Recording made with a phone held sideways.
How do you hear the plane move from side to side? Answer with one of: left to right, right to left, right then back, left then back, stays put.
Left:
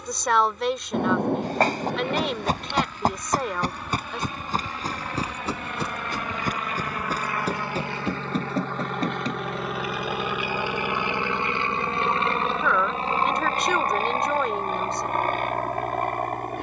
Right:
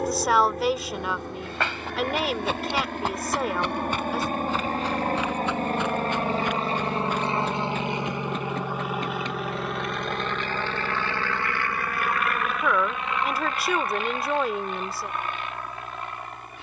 right to left.